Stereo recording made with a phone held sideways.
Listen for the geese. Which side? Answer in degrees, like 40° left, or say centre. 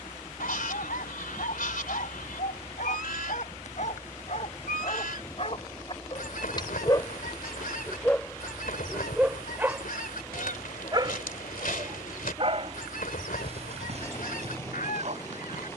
80° left.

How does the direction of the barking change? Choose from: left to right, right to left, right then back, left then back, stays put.
left to right.